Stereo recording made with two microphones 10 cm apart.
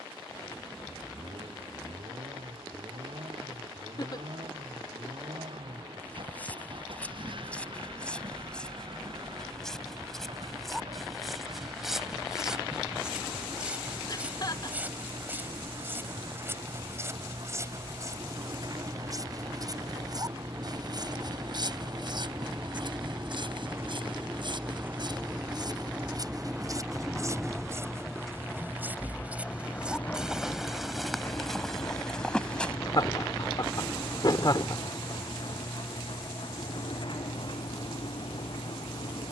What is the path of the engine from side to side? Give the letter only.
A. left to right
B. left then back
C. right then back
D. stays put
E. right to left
E.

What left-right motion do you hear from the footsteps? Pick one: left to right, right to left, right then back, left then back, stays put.
right then back.